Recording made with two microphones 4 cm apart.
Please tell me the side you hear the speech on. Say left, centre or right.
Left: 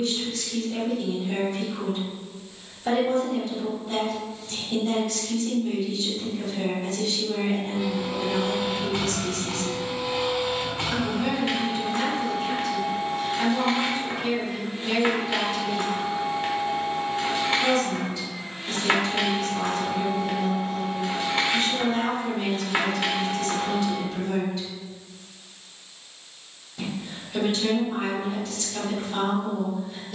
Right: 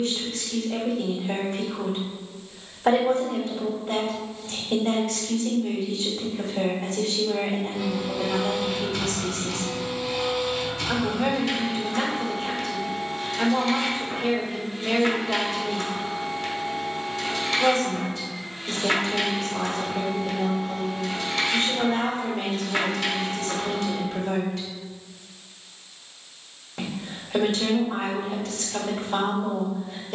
right.